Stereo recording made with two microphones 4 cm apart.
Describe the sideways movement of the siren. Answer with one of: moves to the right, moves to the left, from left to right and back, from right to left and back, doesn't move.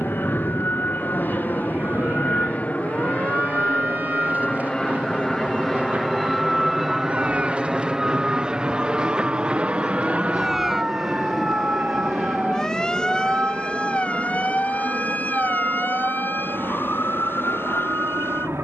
moves to the left.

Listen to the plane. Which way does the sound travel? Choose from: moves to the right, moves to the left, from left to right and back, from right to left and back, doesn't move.
moves to the right.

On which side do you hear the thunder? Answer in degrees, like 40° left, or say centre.
50° left.